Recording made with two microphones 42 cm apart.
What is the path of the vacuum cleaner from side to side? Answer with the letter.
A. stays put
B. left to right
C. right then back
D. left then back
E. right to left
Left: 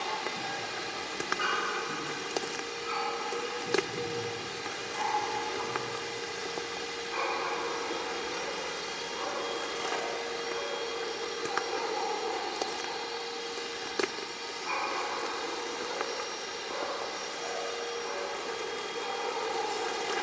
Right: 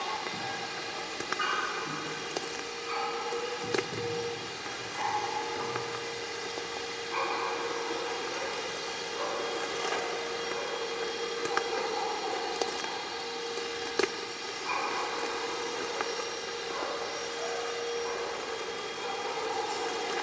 B.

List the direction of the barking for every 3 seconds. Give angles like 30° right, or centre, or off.
60° right, 60° right, centre, 40° left, 10° right, 60° right, 60° right.